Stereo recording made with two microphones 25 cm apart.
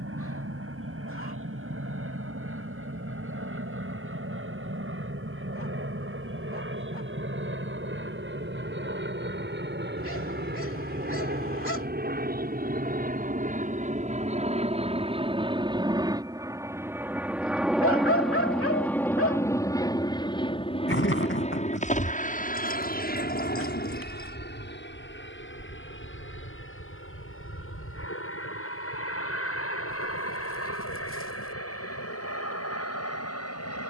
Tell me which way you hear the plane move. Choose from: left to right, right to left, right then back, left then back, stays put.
right to left.